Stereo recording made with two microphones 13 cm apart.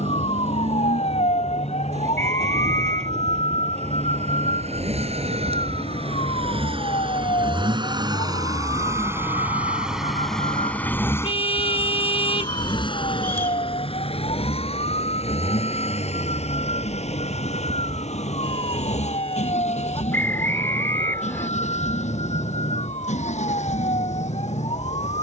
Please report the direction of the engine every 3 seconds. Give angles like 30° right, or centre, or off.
70° right, 60° right, 40° right, 10° left, 50° left, 70° left, 70° left, 80° left, 80° left.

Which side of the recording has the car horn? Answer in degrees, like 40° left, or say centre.
50° left.